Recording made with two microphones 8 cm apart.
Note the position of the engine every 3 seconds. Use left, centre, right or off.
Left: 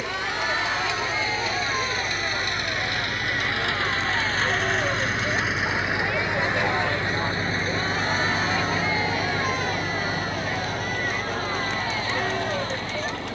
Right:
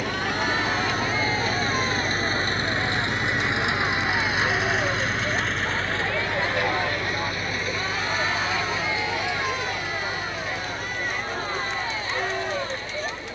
right, centre, left, left, left.